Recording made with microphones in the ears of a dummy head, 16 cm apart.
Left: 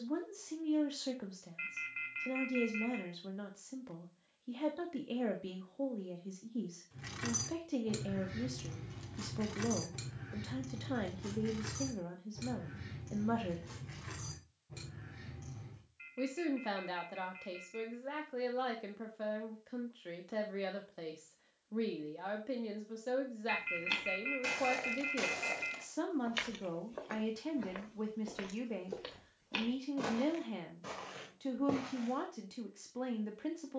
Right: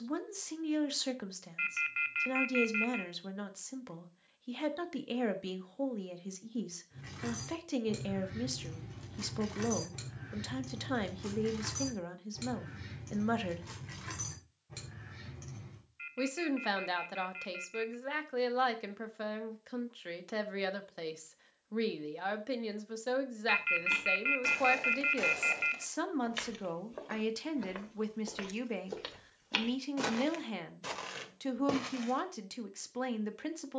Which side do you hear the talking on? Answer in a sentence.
You can hear the talking on the right.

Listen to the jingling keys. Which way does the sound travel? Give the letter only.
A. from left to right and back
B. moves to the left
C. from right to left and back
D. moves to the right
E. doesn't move
D.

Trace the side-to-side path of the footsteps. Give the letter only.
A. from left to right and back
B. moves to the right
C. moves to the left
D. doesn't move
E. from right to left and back
B.